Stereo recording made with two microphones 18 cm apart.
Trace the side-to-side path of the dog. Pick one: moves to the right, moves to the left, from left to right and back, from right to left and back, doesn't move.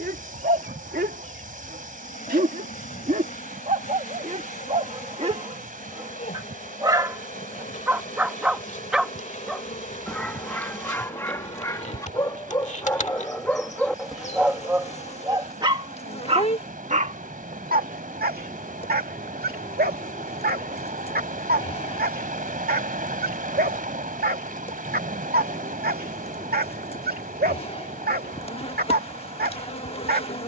from right to left and back.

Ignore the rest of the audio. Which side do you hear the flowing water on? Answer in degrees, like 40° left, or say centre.
50° right.